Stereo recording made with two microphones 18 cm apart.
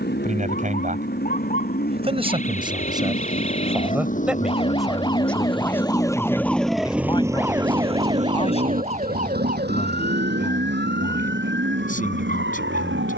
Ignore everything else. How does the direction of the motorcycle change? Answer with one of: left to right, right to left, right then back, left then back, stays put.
left to right.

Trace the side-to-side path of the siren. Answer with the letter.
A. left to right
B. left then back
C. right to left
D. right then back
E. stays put
A.